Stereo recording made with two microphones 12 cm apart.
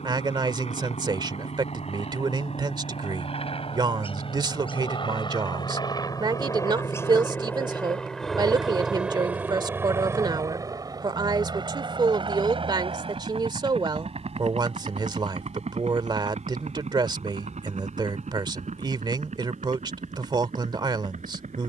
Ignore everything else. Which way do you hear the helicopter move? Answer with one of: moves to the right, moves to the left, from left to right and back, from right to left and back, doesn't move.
moves to the right.